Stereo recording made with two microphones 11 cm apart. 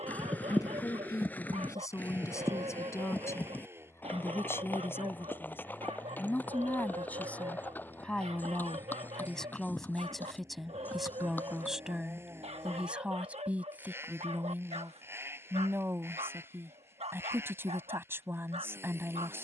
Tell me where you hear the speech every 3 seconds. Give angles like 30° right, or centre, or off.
30° left, 20° left, 10° left, centre, 10° right, 20° right, 20° right.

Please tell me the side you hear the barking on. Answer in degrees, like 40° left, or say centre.
70° right.